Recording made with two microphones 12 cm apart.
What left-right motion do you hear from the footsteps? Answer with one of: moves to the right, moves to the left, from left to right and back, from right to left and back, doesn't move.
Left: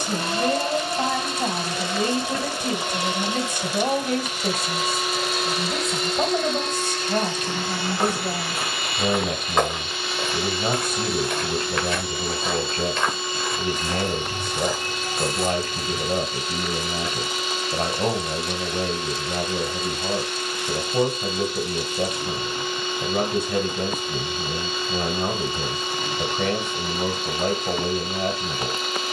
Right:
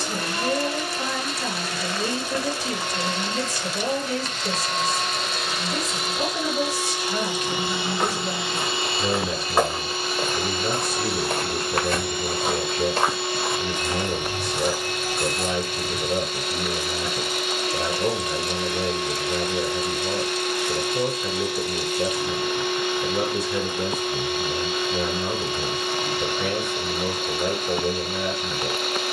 from left to right and back.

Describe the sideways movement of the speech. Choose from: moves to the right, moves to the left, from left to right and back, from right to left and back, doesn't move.
doesn't move.